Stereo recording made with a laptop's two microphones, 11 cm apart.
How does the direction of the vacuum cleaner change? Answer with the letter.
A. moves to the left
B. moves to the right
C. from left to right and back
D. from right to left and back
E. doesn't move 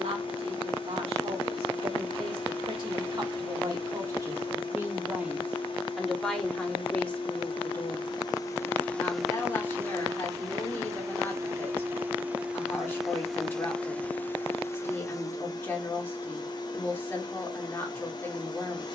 C.